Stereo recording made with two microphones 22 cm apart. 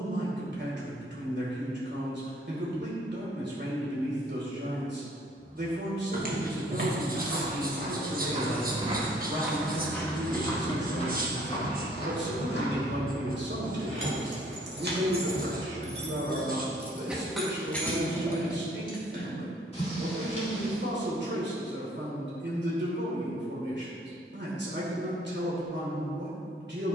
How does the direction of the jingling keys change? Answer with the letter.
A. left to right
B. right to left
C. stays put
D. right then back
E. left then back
B.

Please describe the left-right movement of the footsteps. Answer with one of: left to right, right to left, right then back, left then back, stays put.
right to left.